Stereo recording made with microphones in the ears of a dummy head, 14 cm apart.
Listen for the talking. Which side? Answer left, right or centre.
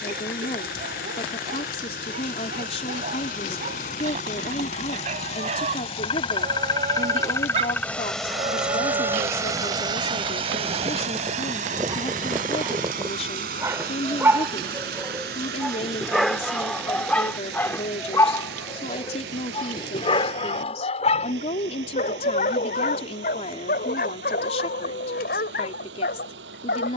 left.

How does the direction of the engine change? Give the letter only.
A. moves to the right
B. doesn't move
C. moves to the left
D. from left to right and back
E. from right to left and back
A.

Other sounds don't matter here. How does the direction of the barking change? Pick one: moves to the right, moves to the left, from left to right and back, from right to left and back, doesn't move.
moves to the left.